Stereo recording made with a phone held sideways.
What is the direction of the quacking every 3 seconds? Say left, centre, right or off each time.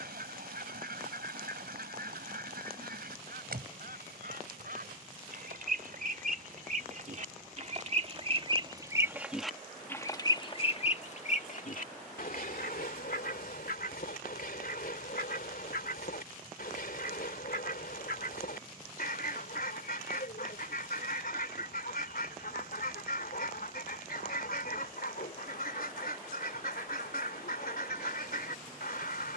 right, right, right, left, left, left, left, left, left, left.